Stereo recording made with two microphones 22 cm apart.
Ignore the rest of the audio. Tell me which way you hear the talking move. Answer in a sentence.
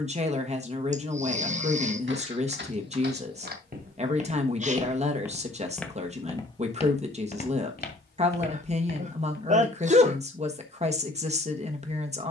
In this clip you hear the talking stay in one place.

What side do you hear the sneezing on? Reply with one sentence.
In this clip you hear the sneezing on the right.